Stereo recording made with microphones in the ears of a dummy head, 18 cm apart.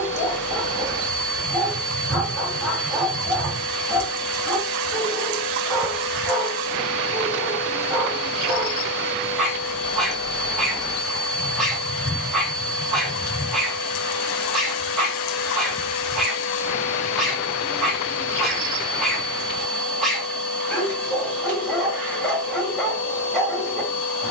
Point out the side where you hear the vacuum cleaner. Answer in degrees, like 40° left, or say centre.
10° left.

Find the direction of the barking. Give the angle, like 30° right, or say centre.
centre.